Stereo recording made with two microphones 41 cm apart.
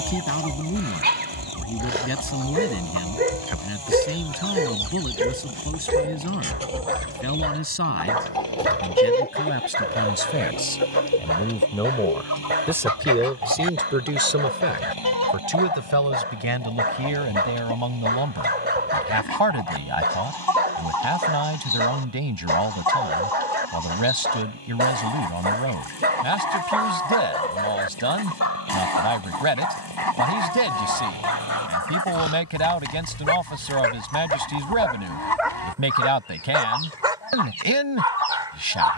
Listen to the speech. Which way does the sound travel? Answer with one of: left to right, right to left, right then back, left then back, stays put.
left to right.